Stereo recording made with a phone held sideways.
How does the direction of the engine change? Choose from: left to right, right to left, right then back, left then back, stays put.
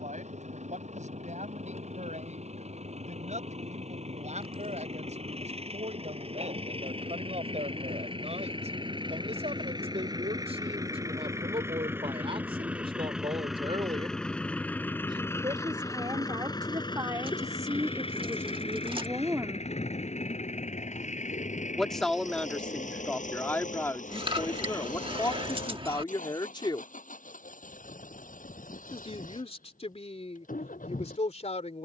right to left.